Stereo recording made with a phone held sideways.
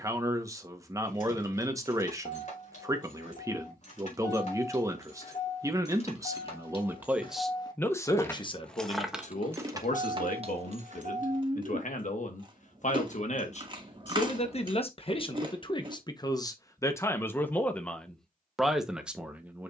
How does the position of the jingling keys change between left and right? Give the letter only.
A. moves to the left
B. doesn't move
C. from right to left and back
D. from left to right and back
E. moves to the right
E.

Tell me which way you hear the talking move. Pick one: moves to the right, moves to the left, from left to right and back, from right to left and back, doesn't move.
from right to left and back.